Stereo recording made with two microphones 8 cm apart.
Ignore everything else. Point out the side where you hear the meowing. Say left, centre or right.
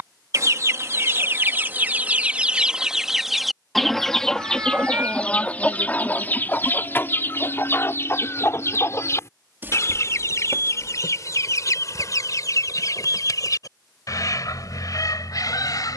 right.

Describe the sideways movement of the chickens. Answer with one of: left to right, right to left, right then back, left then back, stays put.
right to left.